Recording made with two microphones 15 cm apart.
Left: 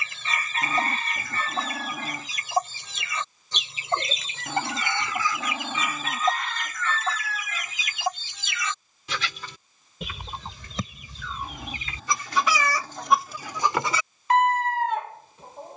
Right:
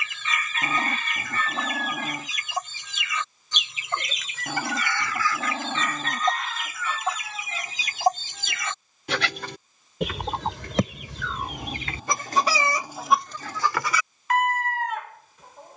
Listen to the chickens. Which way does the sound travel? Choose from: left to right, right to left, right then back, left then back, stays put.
right then back.